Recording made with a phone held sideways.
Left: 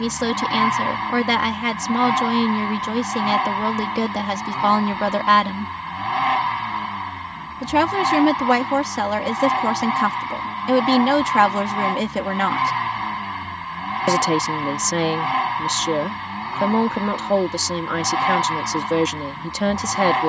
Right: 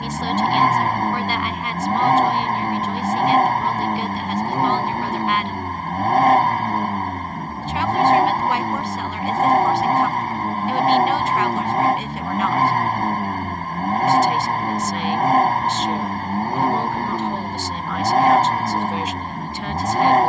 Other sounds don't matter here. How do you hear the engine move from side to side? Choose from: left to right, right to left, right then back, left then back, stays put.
stays put.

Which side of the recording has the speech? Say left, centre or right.
left.